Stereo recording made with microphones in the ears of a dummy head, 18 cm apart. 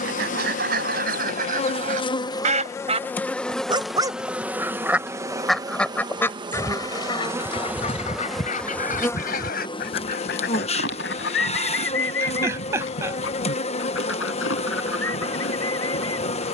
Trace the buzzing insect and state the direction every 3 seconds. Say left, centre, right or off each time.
left, centre, centre, left, left, left.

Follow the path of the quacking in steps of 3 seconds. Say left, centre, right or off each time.
right, centre, left, left, left, left.